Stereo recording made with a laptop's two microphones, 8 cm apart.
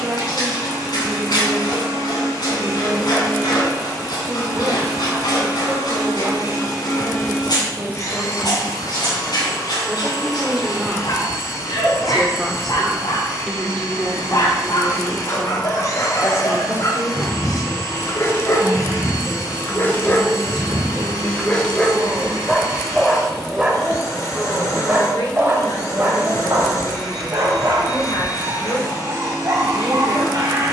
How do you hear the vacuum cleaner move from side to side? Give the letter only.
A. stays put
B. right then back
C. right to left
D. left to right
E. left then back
A.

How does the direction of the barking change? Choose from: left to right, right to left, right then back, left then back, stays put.
left to right.